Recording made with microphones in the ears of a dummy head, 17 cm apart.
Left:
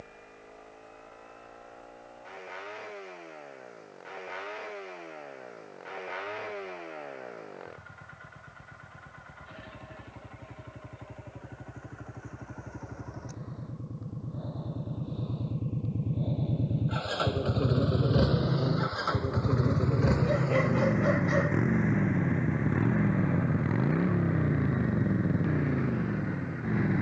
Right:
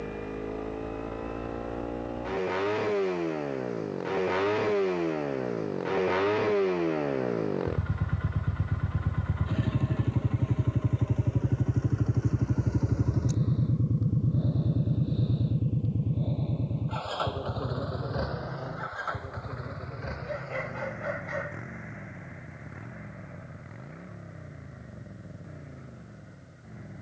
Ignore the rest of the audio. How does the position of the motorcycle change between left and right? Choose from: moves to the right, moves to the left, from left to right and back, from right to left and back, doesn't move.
moves to the left.